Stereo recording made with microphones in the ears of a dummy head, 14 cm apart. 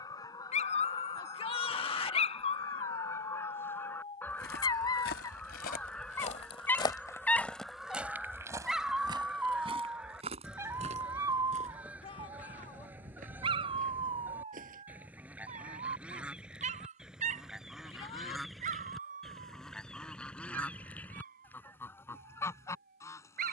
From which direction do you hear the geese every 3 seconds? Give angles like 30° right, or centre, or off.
20° left, 10° left, centre, 10° right, 10° right, 10° right, centre, 20° left.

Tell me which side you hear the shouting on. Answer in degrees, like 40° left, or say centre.
30° left.